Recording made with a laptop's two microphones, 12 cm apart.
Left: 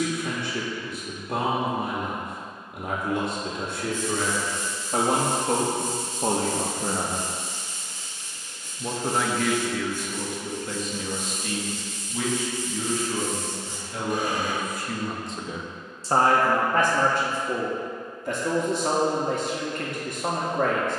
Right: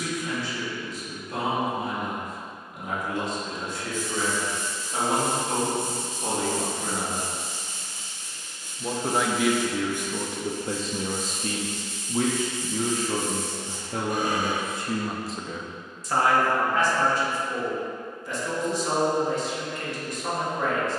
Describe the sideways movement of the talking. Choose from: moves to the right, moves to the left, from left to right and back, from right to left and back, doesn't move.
from left to right and back.